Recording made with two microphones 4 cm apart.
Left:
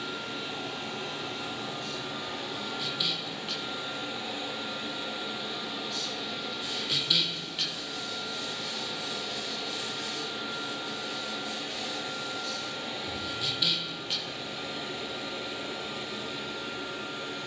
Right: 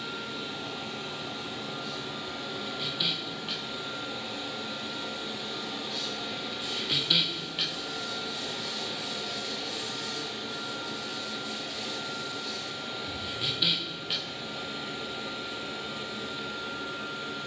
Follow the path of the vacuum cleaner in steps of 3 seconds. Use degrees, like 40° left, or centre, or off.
60° left, 40° left, centre, 20° left, 60° left, 60° left.